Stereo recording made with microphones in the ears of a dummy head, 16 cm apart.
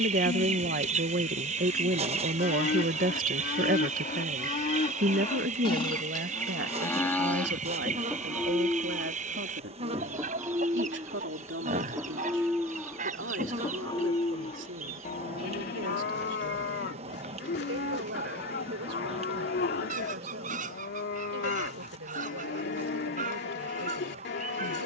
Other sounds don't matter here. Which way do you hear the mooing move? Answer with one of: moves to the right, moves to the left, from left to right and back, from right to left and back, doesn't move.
from left to right and back.